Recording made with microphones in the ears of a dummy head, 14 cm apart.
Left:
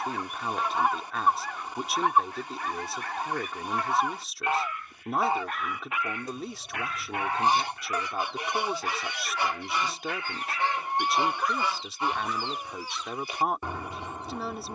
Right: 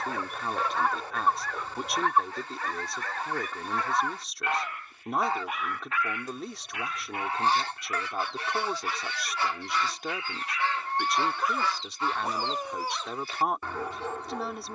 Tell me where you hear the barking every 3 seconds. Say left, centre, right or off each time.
right, right, left, left, right.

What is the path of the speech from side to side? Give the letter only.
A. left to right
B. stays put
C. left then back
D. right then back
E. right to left
B.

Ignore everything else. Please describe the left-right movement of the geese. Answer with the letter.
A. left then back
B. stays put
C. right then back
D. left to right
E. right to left
B.